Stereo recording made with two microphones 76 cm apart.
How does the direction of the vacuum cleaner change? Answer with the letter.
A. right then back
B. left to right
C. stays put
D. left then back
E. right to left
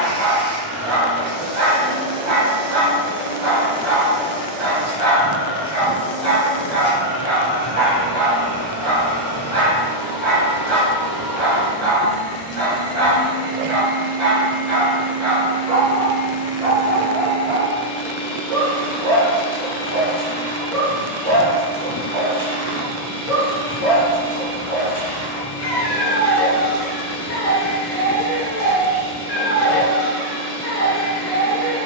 D.